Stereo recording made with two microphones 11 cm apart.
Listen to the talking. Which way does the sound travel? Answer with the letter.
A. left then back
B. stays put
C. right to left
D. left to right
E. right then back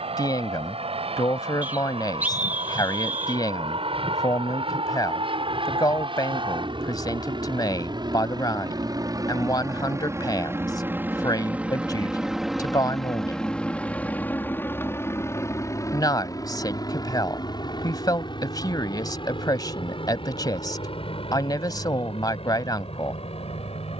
B.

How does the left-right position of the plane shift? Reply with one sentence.
In this clip you hear the plane go from the right side to the left.